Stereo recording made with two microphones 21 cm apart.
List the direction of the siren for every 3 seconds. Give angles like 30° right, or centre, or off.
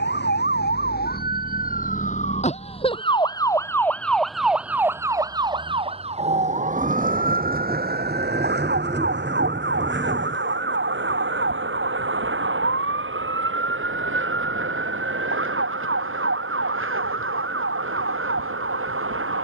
40° left, centre, 40° right, 60° right, 70° right, 70° right, 70° right.